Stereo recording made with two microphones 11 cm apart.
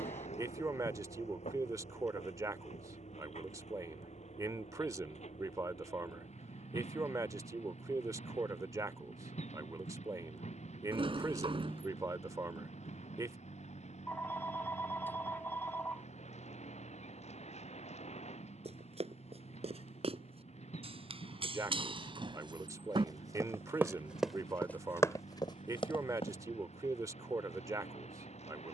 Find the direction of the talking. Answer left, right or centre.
right.